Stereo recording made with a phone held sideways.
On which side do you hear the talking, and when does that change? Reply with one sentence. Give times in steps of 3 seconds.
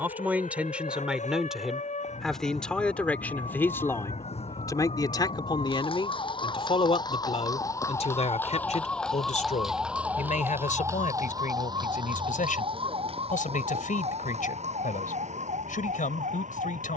In this clip you hear the talking in the centre from 0 s and on the left from 3 s.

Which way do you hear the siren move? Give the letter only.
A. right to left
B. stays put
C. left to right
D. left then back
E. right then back
C.